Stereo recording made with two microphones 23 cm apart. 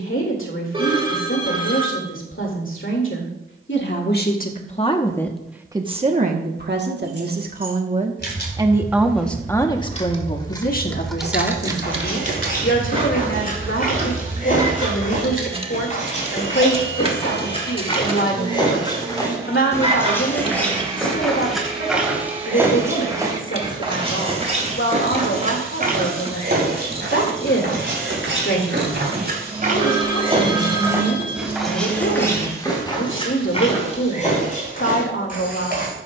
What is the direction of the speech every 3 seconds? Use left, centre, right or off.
left, left, right, left, left, left, left, left, left, left, left, left.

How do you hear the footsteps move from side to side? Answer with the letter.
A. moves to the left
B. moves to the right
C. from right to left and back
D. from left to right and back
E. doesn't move
D.